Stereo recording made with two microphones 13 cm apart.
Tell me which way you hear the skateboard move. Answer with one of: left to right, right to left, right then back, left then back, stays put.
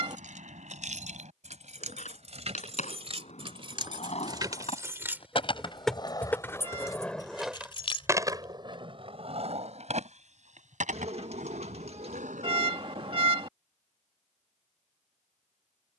left to right.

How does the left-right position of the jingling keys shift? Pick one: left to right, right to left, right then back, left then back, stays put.
right to left.